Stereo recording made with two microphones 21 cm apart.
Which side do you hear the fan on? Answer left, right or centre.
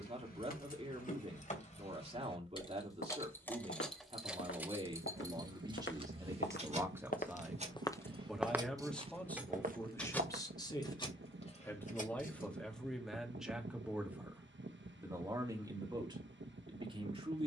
right.